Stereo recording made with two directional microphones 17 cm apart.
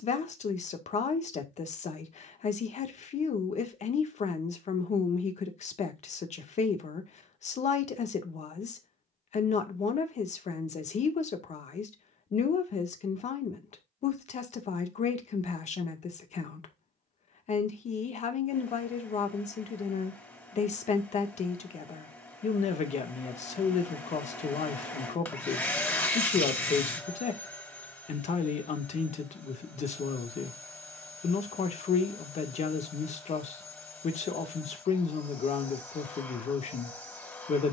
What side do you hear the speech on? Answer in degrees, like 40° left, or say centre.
40° left.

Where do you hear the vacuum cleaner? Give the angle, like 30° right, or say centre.
10° left.